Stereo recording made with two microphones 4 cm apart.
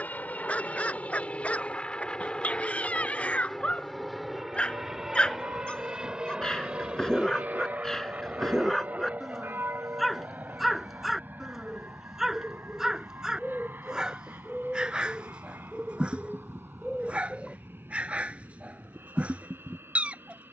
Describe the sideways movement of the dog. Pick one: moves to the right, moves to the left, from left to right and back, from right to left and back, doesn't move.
moves to the right.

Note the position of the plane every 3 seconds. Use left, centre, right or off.
left, centre, right, right, right, right, right.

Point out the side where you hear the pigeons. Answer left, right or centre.
centre.